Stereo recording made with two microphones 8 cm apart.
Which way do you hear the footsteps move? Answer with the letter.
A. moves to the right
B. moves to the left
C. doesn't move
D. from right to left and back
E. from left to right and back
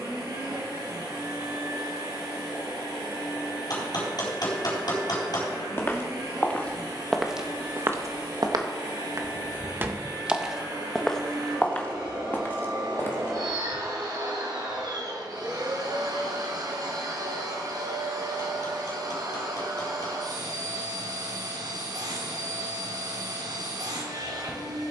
E.